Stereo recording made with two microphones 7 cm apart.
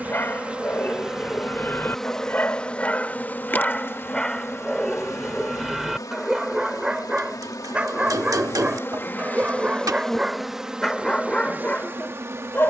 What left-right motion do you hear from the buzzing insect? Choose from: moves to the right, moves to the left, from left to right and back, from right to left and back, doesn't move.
from right to left and back.